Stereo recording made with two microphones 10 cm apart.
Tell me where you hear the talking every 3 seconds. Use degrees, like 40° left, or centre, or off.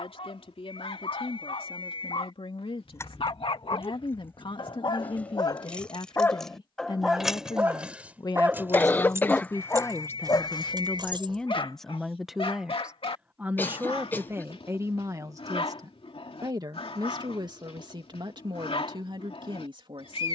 70° left, 60° left, 50° left, 20° left, 20° right, 40° right, 60° right.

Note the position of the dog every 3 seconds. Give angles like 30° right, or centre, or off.
80° left, 60° left, 10° right, 40° left, 70° left, 80° left, 80° left.